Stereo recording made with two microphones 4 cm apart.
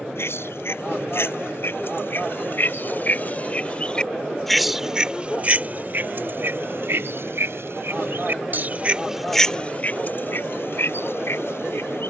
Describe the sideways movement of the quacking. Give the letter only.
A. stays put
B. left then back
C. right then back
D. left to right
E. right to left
C.